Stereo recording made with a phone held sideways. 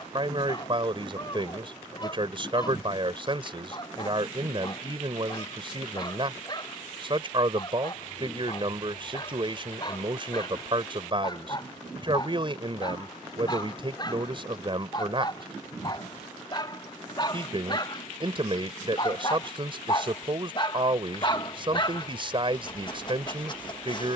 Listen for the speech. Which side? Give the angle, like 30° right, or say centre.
40° right.